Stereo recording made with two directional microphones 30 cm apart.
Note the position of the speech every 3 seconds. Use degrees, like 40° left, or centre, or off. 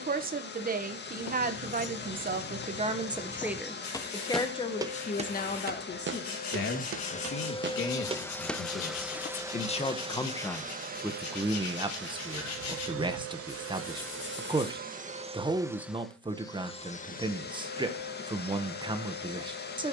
30° right, 10° left, 40° left, centre, 20° right, 20° right, 20° right.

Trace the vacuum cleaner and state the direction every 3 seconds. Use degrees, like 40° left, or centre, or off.
30° left, 30° left, 20° left, 20° right, 40° right, 10° left, 30° left.